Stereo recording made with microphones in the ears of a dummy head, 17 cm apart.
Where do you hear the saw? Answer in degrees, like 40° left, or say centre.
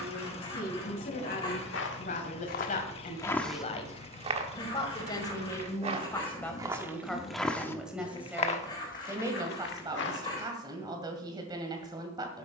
20° left.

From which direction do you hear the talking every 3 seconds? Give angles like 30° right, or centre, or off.
50° left, 30° left, centre, 20° right.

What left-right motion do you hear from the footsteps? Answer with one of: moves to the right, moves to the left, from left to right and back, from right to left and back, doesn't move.
from left to right and back.